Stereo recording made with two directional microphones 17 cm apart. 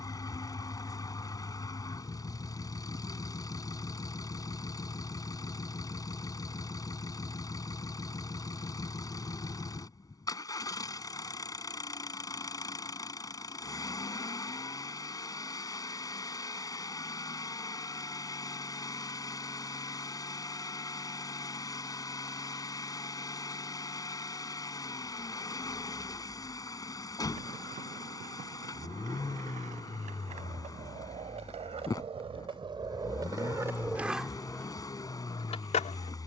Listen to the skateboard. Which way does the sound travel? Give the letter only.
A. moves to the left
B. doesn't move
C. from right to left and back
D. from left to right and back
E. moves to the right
A.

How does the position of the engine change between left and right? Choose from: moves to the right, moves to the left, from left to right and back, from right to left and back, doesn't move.
doesn't move.